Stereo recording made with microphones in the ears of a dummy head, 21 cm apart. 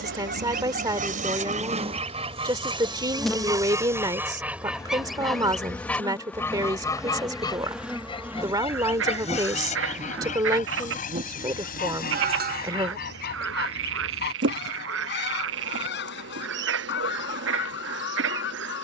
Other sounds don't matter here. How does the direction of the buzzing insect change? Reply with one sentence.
In this clip you hear the buzzing insect move from right to left and back again.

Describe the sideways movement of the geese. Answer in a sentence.
You can hear the geese go from the right side to the left.